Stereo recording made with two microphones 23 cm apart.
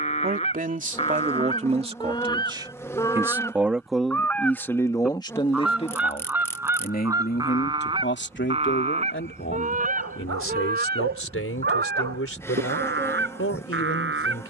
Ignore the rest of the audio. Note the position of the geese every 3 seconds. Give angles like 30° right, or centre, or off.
20° left, 10° left, 20° right, 40° right, 60° right.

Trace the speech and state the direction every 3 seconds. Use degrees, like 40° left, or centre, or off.
30° right, 10° left, 40° left, 60° left, 70° left.